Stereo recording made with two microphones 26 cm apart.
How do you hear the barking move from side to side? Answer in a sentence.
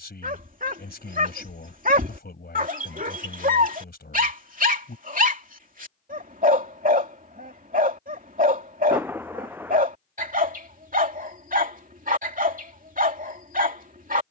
You can hear the barking stay put.